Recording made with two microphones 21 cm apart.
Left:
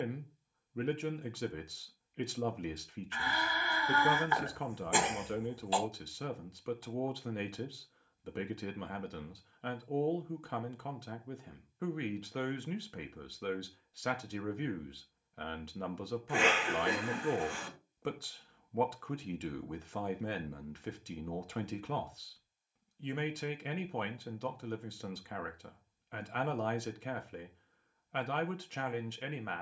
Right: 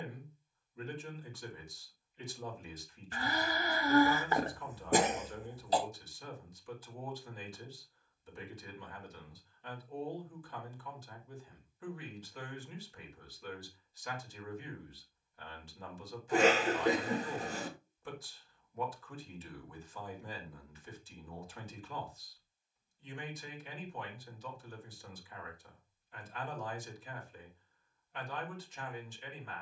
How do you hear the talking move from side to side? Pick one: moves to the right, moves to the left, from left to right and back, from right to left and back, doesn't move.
doesn't move.